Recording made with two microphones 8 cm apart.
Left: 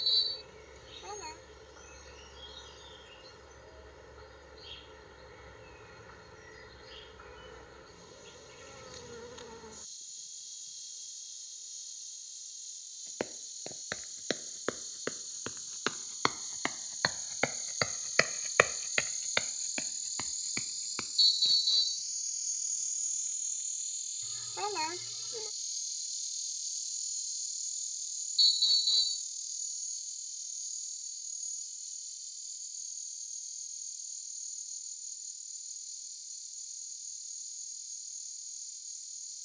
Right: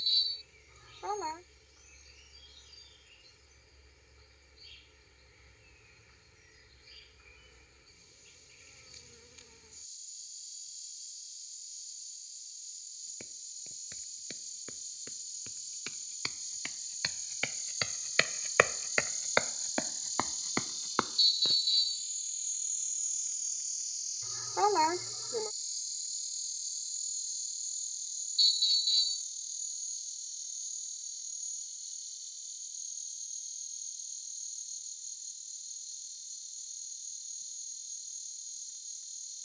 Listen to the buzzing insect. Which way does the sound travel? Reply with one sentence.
You can hear the buzzing insect travel towards the right.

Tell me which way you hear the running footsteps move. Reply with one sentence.
In this clip you hear the running footsteps move to the right.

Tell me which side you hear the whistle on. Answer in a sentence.
In this clip you hear the whistle on the left.